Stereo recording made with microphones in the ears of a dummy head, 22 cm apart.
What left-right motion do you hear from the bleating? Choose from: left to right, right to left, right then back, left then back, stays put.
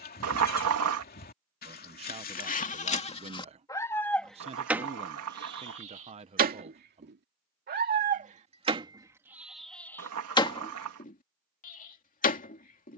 right then back.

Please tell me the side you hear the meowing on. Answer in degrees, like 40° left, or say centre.
60° right.